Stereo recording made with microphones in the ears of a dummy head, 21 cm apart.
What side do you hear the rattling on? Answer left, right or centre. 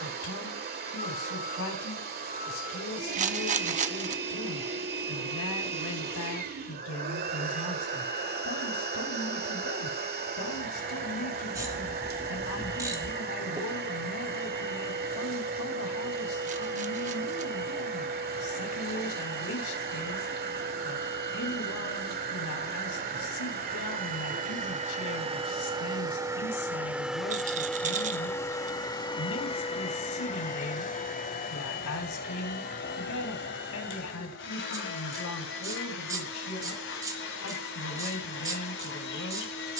right.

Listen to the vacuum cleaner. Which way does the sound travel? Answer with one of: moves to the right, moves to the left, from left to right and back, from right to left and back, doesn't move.
moves to the left.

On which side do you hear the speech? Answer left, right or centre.
left.